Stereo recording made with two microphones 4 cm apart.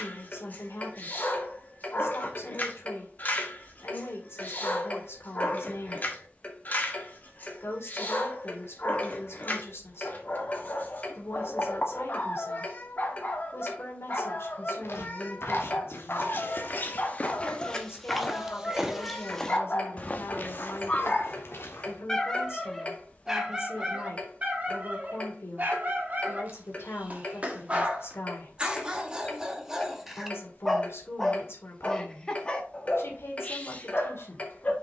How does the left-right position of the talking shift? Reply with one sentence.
In this clip you hear the talking stay in one place.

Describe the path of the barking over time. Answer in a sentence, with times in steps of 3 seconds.
In this clip you hear the barking on the left from 0 s, in the centre from 21 s, on the right from 24 s, in the centre from 30 s and on the left from 33 s.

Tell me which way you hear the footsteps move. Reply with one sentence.
You can hear the footsteps go right and come back.